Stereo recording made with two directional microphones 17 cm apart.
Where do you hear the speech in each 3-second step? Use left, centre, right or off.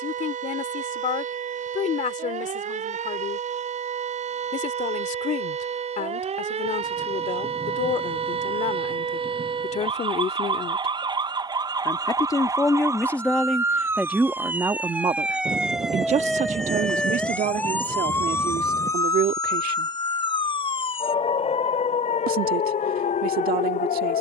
left, left, left, left, centre, right, right, right.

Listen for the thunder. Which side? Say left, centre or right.
right.